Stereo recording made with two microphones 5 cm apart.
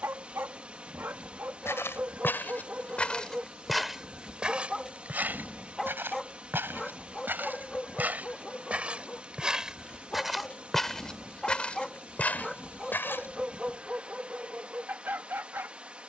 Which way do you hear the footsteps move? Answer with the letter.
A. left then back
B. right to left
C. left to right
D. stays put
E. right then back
E.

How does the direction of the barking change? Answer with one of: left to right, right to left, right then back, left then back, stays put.
left then back.